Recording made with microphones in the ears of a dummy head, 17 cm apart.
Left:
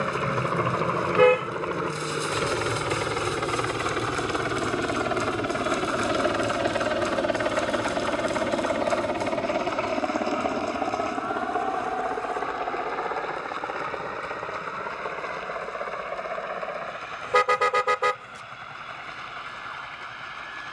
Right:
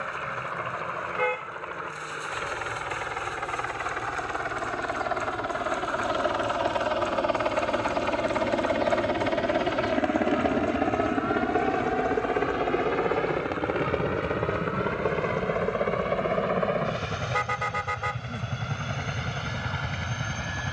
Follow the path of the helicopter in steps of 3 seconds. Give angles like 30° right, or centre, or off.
60° left, 40° left, 10° left, 20° right, 40° right, 50° right, 60° right.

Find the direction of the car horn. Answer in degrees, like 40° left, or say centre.
70° left.